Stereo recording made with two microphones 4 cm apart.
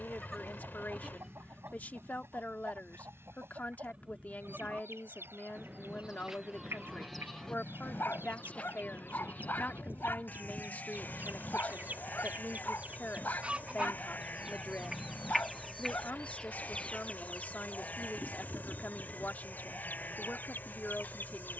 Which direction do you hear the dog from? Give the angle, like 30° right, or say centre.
60° left.